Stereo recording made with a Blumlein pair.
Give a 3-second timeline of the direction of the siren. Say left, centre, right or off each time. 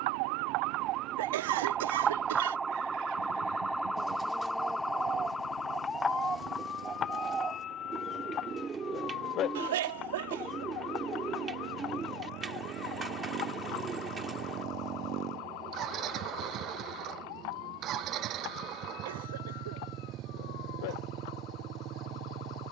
right, centre, left, left, left, left, left, left.